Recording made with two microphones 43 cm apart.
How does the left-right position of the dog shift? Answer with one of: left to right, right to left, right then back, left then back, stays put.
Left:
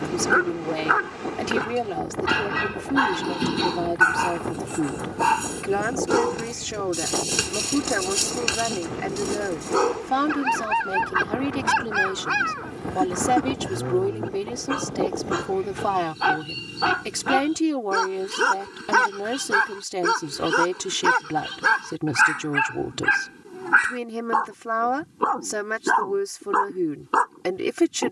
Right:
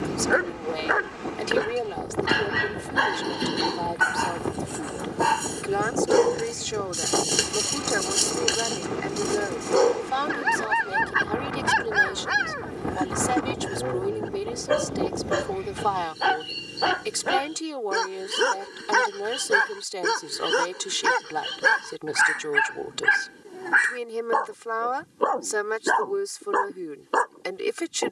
stays put.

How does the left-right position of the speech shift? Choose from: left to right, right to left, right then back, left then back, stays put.
stays put.